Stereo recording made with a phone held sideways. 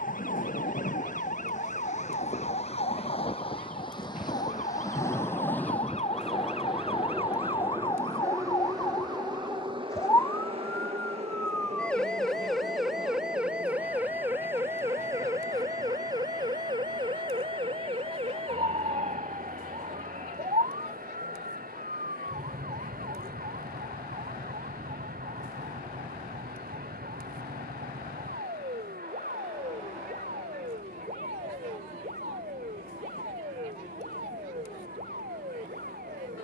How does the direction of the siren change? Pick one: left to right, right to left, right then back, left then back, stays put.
left to right.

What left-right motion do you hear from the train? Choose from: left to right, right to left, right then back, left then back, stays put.
left to right.